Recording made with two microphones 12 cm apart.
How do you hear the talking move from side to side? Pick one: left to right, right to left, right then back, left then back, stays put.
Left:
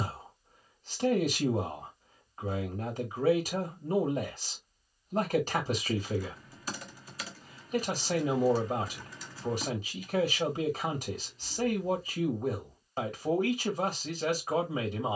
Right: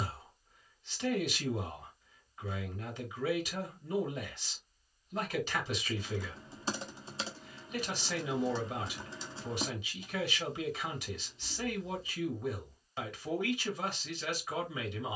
stays put.